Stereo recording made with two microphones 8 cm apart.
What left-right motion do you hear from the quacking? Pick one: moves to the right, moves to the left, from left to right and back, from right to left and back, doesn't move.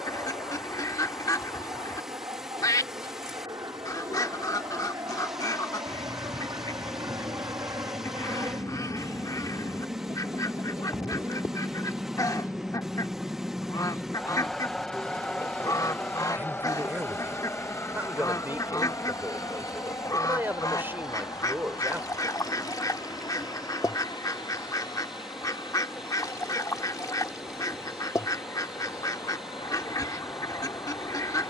doesn't move.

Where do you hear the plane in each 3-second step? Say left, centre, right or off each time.
right, right, right, right, centre, left, left, left, left, left, left.